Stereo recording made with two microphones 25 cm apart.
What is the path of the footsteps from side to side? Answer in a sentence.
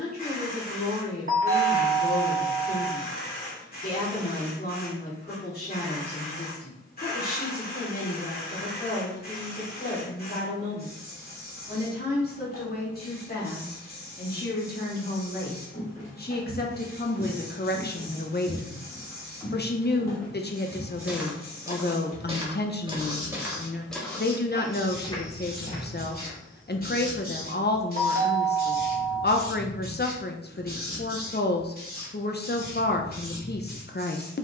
In this clip you hear the footsteps move from left to right and back again.